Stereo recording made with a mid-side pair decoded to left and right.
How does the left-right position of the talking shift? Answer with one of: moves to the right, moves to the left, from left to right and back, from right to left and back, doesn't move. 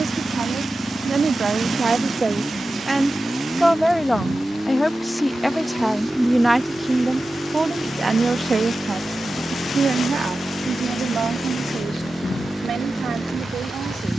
from right to left and back.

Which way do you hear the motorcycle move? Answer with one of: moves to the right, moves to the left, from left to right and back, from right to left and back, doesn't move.
doesn't move.